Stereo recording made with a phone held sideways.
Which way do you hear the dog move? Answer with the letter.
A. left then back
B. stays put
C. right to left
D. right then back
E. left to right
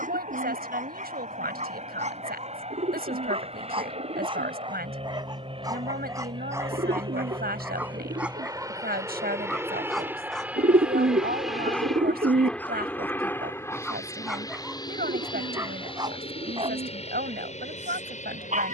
A.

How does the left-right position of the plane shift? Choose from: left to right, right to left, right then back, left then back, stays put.
right to left.